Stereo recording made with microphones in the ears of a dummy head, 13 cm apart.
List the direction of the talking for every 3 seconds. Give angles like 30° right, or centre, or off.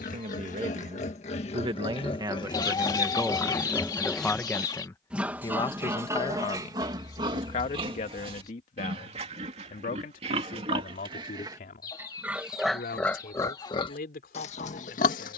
40° right, 10° left, 50° left, 60° left, 70° left.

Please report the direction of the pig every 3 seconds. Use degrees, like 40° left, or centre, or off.
40° left, centre, 30° right, 40° right, 20° left.